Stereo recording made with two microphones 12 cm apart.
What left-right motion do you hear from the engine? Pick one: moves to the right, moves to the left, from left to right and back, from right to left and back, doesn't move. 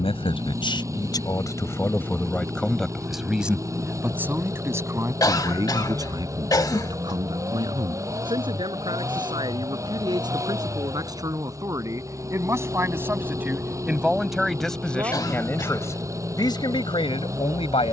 doesn't move.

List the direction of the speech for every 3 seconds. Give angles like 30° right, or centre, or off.
30° left, 20° right, 40° right, 30° right, 10° right, 30° left.